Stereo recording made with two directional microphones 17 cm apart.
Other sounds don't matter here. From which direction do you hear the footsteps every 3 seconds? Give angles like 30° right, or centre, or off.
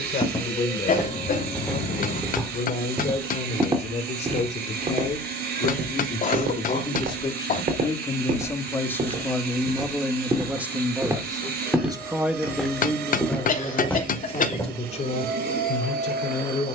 10° left, 40° right, 50° right, 20° right, 10° left, off.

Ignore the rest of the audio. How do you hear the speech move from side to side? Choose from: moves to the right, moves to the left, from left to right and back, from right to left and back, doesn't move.
from left to right and back.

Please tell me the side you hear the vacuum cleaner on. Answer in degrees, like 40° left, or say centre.
70° right.